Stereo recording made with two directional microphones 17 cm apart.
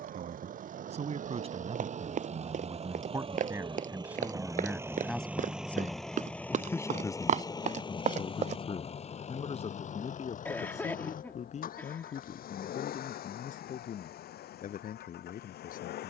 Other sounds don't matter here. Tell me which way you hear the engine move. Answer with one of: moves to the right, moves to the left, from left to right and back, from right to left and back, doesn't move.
moves to the left.